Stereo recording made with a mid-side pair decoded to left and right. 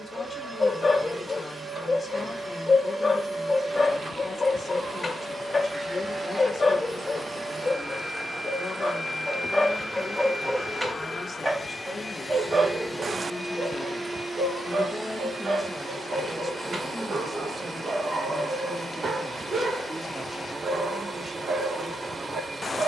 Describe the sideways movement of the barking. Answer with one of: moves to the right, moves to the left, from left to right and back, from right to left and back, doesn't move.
moves to the right.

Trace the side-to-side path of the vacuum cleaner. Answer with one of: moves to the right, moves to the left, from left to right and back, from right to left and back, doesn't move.
from right to left and back.